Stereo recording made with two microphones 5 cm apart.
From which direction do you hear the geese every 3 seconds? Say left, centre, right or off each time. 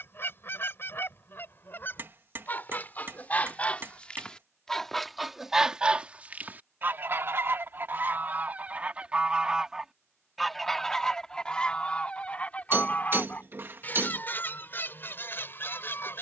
left, centre, right, centre, left, left.